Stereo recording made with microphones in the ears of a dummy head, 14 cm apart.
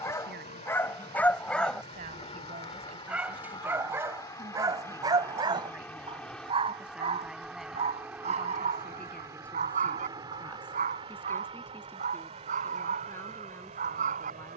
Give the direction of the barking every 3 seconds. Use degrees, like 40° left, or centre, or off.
10° left, 20° right, 40° right, 50° right, 50° right.